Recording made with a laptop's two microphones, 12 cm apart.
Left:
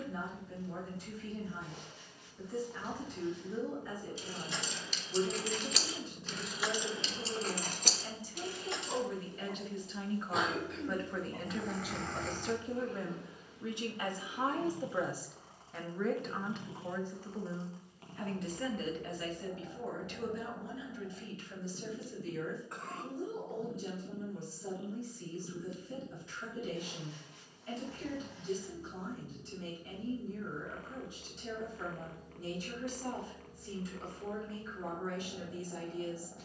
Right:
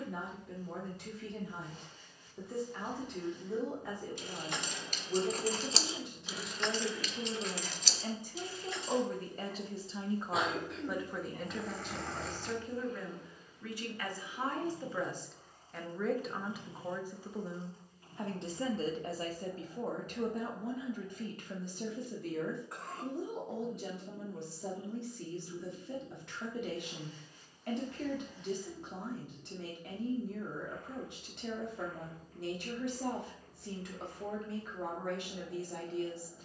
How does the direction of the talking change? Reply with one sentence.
You can hear the talking move from right to left and back again.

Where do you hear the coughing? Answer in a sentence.
In this clip you hear the coughing in the centre.